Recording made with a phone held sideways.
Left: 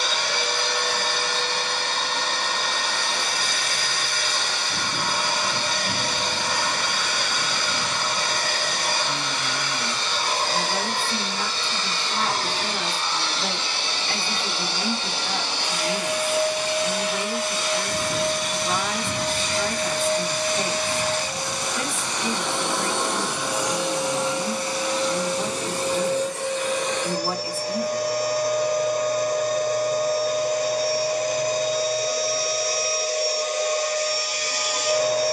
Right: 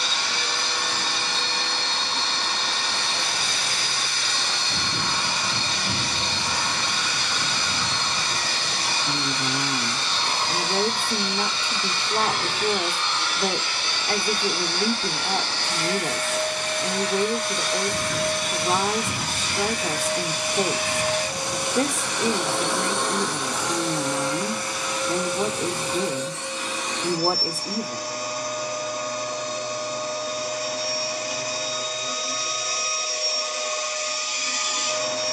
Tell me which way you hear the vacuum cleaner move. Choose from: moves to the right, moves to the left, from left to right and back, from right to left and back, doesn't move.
from left to right and back.